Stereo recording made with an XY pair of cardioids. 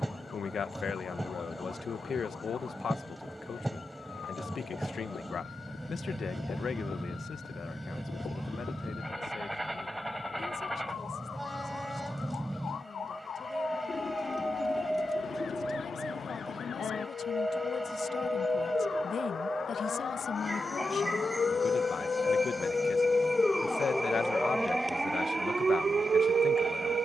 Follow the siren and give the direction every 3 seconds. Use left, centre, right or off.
left, left, left, left, left, left, left, left, right.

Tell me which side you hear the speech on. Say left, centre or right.
left.